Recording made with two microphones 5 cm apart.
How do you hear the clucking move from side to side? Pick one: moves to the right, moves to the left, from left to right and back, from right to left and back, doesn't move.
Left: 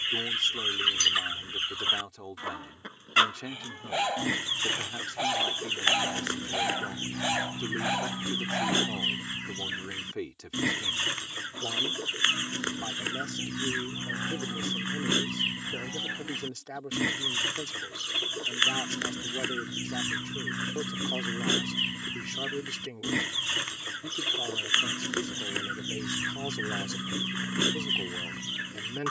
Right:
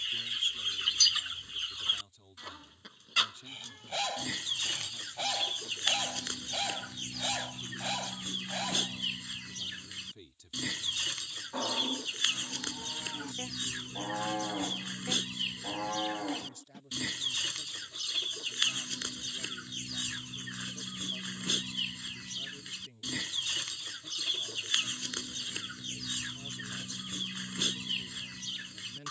doesn't move.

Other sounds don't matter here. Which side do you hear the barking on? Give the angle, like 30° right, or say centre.
20° left.